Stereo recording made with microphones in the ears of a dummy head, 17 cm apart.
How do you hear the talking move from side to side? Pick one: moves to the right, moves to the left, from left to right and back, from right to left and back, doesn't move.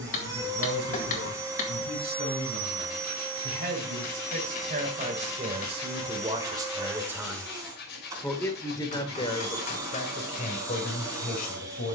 moves to the left.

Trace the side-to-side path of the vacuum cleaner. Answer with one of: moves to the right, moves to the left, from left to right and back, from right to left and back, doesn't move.
doesn't move.